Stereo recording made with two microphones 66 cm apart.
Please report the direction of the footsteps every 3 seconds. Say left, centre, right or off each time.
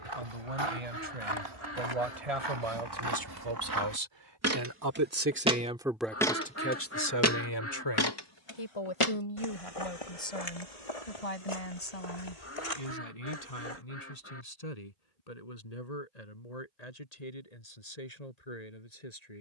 right, right, left, left, left, off, off.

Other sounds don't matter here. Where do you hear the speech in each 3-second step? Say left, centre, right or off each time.
right, right, left, left, left, left, left.